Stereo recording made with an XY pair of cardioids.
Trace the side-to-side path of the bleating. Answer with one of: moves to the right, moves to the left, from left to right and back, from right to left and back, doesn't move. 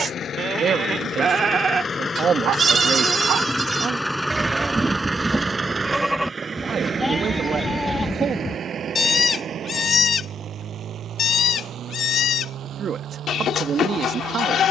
moves to the left.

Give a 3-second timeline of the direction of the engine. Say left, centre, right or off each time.
left, centre, right, right, right.